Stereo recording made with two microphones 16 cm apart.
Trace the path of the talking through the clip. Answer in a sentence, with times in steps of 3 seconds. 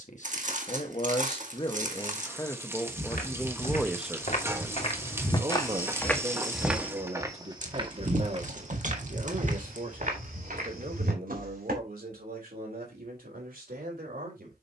You can hear the talking on the left from 0 s, in the centre from 3 s and on the right from 6 s.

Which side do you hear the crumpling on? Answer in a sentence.
In this clip you hear the crumpling on the right.